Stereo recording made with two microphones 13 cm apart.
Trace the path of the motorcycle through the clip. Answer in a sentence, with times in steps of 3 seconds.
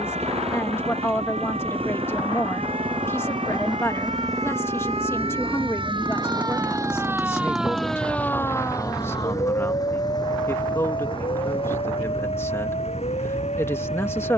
In this clip you hear the motorcycle on the right from 0 s, in the centre from 6 s and on the left from 9 s.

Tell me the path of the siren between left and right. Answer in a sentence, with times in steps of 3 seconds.
In this clip you hear the siren on the right from 0 s, in the centre from 6 s and on the left from 9 s.